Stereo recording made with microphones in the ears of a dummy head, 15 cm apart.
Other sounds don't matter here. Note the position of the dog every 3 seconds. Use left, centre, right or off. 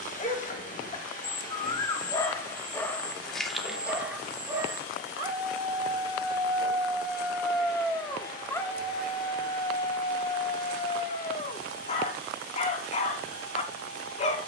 left, centre, centre, left, left.